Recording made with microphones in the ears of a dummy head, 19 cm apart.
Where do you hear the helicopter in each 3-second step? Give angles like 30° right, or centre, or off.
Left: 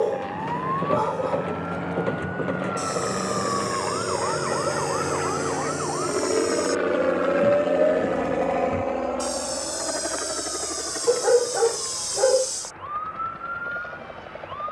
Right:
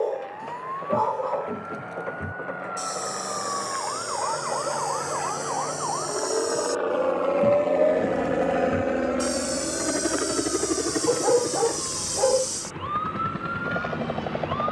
70° left, 60° left, 10° left, 40° right, 70° right.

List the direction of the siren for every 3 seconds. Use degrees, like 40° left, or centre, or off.
50° left, 30° left, 10° left, 30° right, 50° right.